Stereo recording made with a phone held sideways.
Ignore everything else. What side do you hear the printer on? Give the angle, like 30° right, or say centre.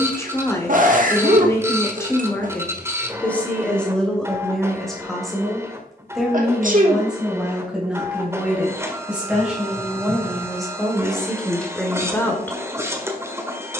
20° right.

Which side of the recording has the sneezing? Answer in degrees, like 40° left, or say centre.
60° right.